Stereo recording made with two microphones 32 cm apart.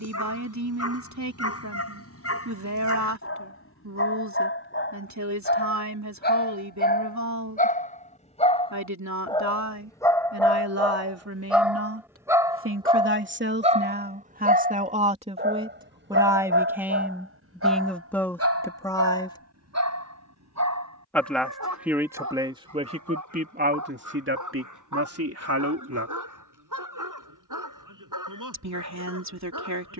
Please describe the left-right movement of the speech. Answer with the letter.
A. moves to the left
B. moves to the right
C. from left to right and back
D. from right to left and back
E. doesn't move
D.